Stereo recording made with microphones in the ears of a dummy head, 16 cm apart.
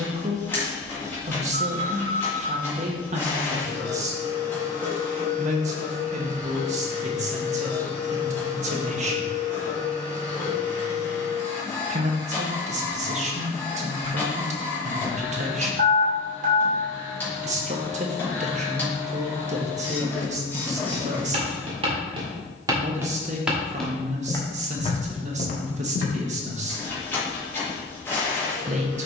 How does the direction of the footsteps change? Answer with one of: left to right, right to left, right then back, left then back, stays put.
right to left.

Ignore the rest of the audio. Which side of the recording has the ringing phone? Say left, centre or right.
right.